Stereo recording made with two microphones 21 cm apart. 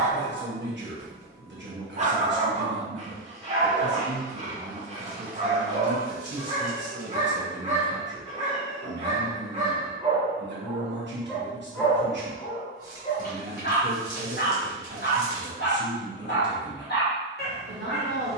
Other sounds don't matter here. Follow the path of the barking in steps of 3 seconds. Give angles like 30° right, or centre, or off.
30° right, 30° right, 30° right, 20° right, 40° left, 50° left.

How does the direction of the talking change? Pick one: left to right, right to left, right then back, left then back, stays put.
stays put.